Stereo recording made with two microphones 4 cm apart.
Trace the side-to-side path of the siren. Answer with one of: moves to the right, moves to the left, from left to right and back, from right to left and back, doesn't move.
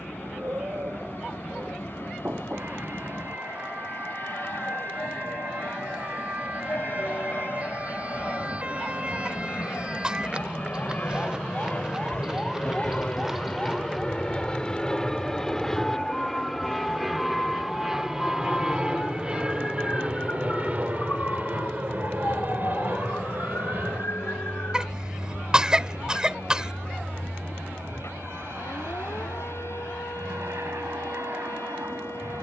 moves to the left.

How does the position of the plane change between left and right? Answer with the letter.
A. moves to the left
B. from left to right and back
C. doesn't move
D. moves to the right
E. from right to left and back
D.